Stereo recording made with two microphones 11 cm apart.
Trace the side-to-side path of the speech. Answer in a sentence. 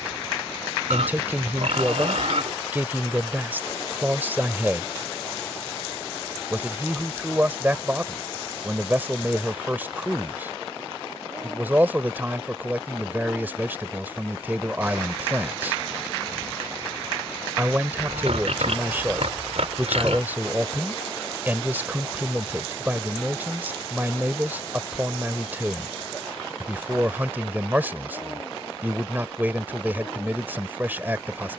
In this clip you hear the speech stay in one place.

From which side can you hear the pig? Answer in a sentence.
You can hear the pig on the right.